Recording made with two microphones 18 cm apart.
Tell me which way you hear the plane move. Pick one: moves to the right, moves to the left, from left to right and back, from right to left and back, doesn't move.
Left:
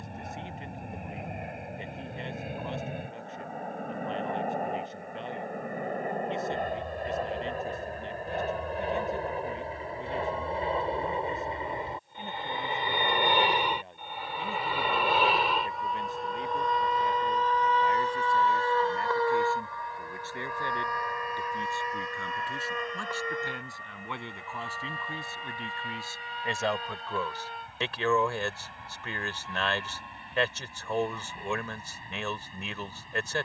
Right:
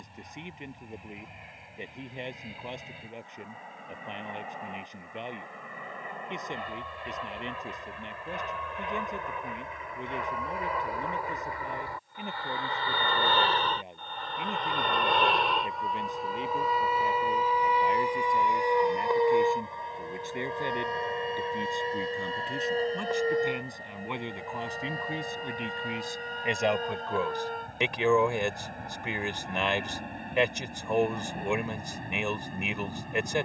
moves to the right.